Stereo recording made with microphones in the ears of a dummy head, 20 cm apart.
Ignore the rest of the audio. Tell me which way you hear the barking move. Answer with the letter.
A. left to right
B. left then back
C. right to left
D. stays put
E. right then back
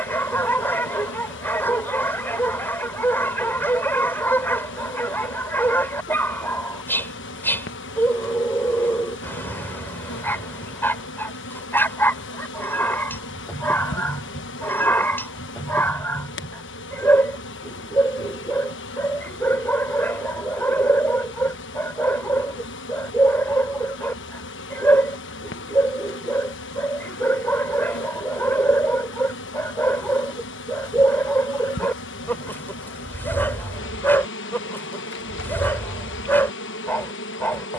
D.